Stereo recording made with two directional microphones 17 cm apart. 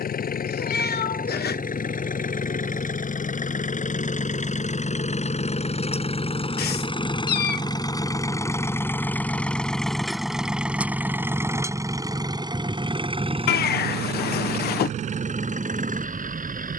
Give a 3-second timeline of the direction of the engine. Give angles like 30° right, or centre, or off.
50° left, 40° left, 20° left, 10° right, 30° right, 50° right.